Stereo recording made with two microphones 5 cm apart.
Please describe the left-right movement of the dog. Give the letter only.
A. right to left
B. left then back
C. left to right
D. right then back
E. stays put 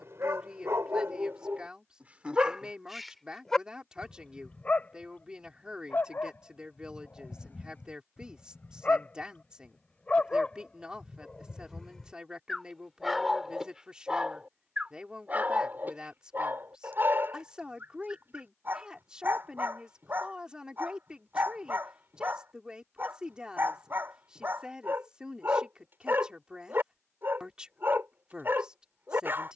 B.